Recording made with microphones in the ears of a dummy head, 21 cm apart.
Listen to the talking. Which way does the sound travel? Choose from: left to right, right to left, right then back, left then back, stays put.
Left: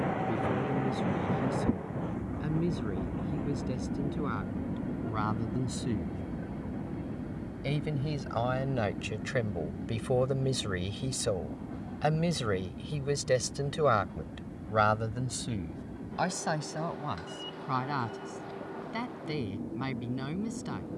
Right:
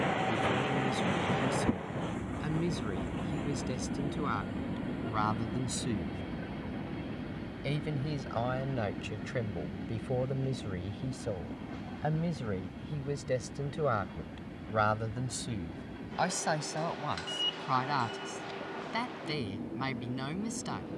left then back.